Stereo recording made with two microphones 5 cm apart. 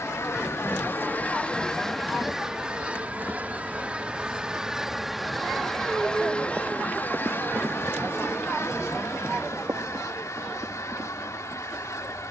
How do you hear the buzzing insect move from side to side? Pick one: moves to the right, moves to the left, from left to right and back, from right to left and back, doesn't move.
moves to the right.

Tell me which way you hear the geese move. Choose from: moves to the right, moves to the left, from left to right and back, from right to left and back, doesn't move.
from left to right and back.